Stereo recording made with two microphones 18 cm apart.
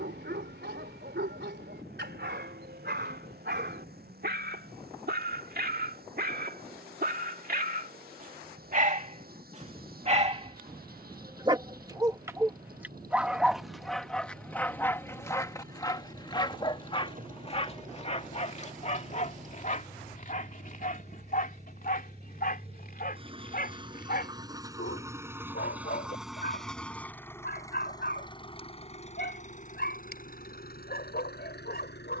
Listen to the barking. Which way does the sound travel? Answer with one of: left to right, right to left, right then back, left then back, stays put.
right to left.